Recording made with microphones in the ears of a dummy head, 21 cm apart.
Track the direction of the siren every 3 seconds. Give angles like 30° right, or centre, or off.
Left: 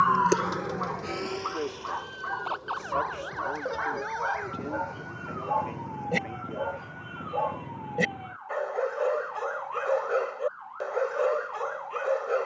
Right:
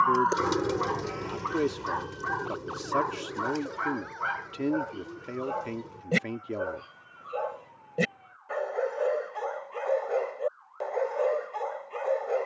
50° left, 70° left, 70° left, 70° left.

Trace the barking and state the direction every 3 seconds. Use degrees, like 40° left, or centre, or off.
50° right, 30° right, 10° right, 10° left.